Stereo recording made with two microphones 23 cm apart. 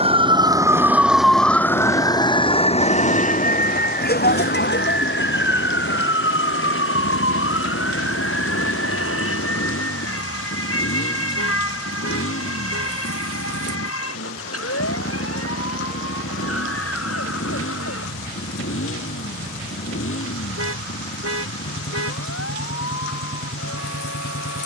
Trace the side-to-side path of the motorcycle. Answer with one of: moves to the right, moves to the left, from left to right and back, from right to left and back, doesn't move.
doesn't move.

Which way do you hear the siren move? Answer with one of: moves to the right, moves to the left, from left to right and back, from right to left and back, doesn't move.
moves to the left.